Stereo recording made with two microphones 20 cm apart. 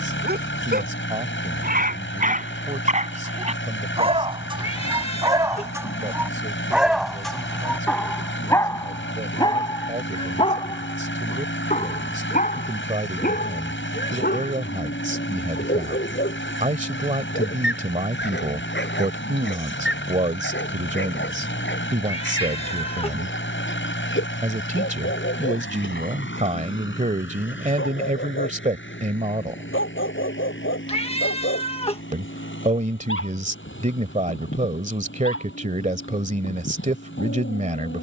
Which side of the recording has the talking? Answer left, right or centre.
right.